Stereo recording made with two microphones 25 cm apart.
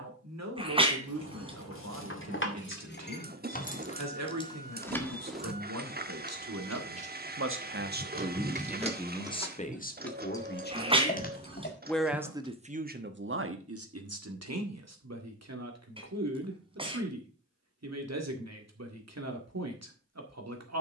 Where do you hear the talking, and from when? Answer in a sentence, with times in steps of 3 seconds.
In this clip you hear the talking on the right from 0 s, on the left from 9 s and on the right from 12 s.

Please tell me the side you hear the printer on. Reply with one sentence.
In this clip you hear the printer on the right.